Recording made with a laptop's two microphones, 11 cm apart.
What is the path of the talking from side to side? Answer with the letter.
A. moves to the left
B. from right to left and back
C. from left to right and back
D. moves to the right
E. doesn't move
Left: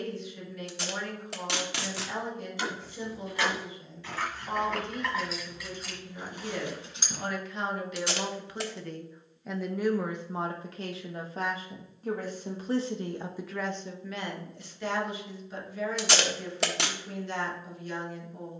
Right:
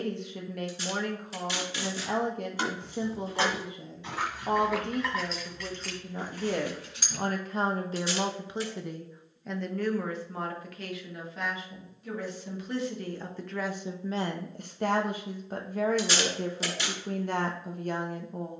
B.